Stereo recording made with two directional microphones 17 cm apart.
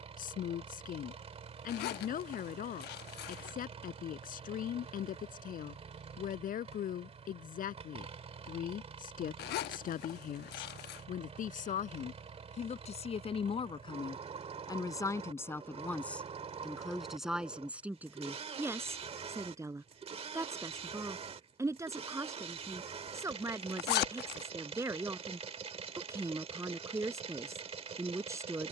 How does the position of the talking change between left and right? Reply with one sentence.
In this clip you hear the talking go from the left side to the right.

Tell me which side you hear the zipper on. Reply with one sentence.
In this clip you hear the zipper on the left.